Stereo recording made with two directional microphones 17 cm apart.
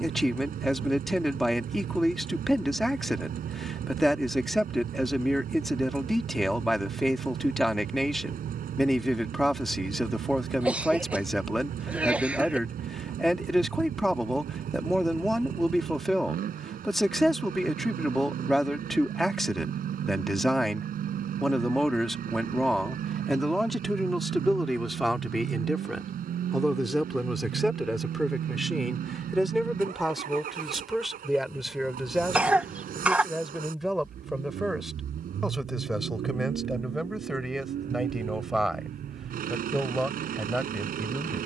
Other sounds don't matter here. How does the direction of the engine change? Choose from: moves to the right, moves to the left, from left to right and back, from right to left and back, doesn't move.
doesn't move.